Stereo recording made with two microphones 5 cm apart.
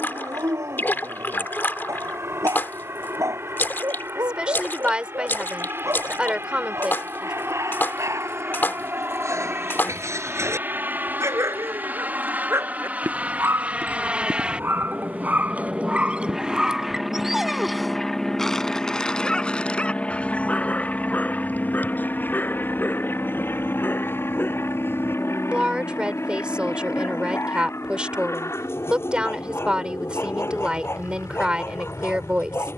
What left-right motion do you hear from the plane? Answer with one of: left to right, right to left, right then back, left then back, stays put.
right to left.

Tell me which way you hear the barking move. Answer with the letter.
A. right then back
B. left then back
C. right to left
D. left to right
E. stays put
C.